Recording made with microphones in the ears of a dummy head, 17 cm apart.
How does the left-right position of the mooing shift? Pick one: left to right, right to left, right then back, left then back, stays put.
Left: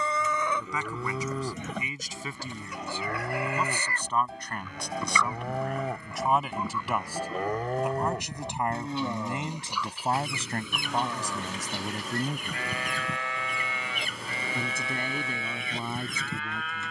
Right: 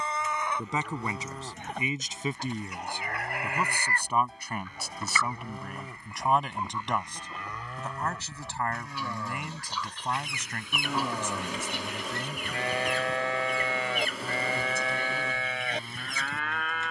left to right.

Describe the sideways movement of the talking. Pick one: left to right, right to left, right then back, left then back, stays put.
right to left.